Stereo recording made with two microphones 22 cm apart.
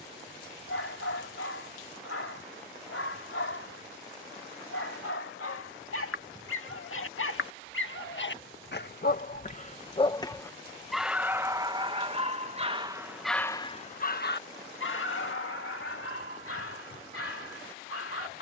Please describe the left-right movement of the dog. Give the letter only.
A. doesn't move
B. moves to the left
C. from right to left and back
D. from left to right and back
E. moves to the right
D.